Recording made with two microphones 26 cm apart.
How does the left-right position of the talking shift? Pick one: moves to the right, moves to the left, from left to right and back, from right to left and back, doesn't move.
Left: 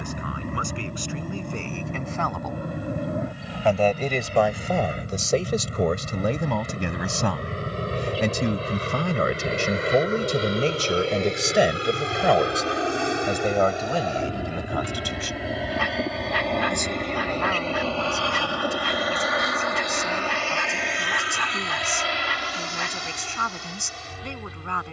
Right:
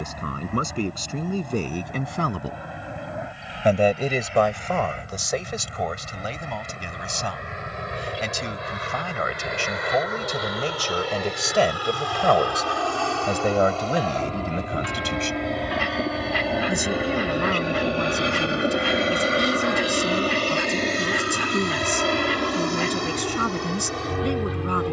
from right to left and back.